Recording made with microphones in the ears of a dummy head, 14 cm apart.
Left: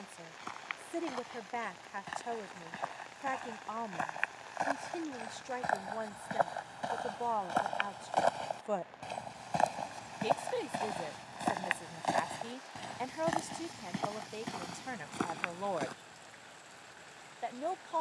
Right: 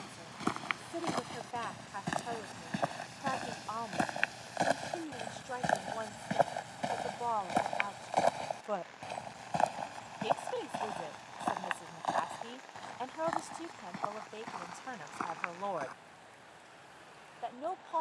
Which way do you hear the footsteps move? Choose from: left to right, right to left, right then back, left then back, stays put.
right to left.